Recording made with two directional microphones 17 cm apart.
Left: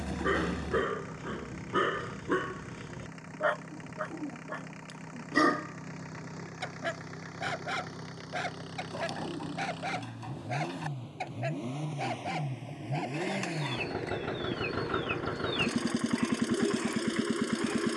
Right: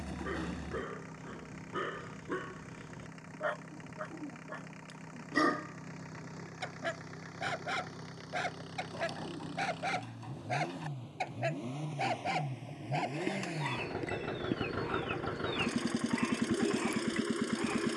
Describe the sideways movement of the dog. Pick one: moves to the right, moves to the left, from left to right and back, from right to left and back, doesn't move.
moves to the right.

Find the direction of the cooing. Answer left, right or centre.
left.